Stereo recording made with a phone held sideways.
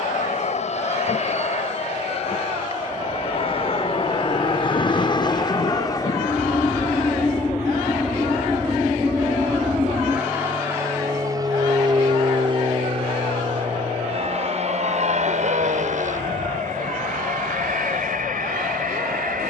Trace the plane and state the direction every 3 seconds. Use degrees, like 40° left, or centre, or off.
50° left, 40° left, 10° left, 20° right, 40° right, 50° right, 60° right.